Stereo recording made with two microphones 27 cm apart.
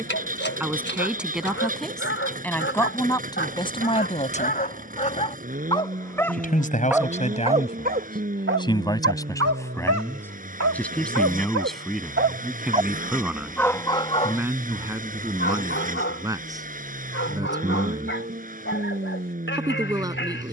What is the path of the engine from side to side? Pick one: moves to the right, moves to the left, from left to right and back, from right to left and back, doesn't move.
doesn't move.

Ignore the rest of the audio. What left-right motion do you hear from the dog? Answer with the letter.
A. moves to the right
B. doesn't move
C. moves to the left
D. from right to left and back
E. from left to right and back
E.